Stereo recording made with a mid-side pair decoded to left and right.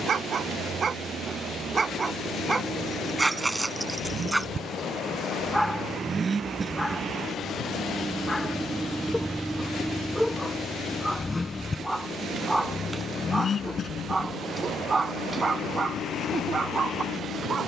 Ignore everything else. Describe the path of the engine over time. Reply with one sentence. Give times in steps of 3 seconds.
In this clip you hear the engine on the right from 0 s, in the centre from 9 s and on the left from 12 s.